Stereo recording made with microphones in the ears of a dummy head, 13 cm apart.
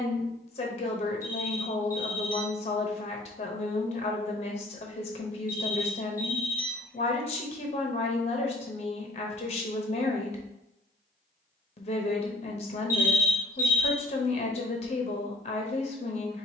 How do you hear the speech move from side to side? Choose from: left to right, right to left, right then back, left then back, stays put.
stays put.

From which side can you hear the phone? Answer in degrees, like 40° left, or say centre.
20° right.